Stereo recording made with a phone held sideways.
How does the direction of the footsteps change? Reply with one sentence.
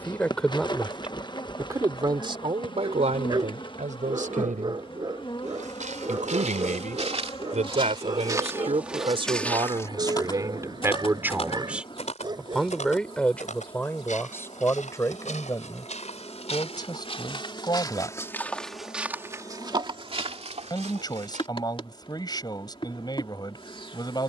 In this clip you hear the footsteps go left and come back.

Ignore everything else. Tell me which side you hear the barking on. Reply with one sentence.
In this clip you hear the barking on the right.